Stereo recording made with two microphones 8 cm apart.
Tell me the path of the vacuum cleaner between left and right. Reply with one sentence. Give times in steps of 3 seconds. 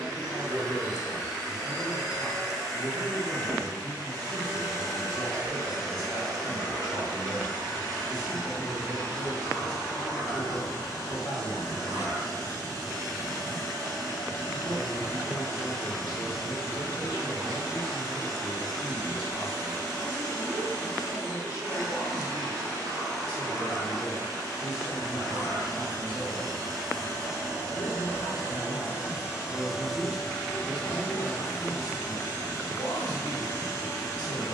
In this clip you hear the vacuum cleaner on the right from 0 s and on the left from 30 s.